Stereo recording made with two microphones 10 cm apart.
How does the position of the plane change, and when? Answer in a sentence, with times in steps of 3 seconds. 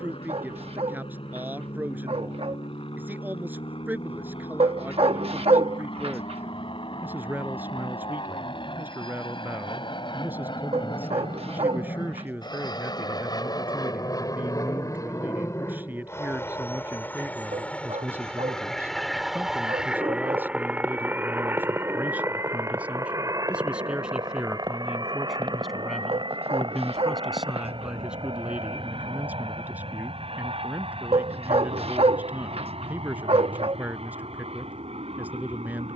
In this clip you hear the plane on the left from 0 s, in the centre from 18 s and on the right from 21 s.